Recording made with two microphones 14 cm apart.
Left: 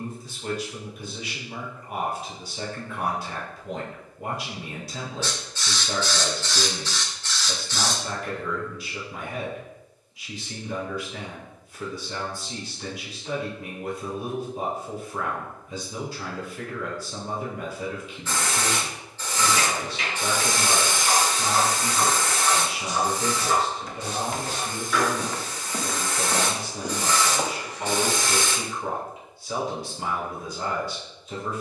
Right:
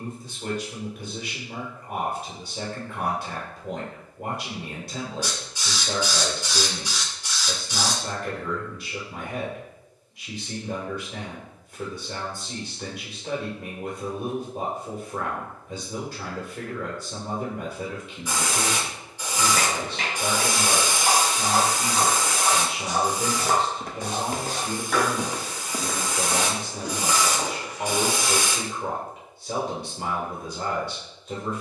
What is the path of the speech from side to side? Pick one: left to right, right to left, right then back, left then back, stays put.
stays put.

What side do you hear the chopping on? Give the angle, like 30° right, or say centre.
70° right.